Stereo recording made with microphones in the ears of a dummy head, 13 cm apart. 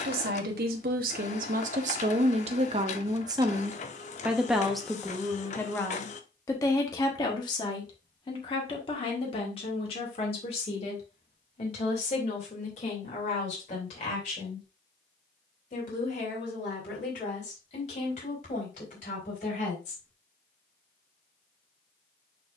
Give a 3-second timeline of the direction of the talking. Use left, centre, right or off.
right, centre, left, left, left, left, left, off.